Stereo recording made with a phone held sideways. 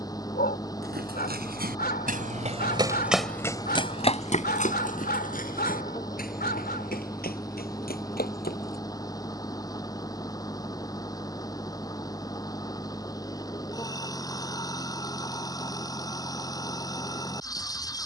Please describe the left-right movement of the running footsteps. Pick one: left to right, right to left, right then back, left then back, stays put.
right to left.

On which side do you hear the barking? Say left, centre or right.
left.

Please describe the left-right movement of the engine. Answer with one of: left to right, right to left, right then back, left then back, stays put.
stays put.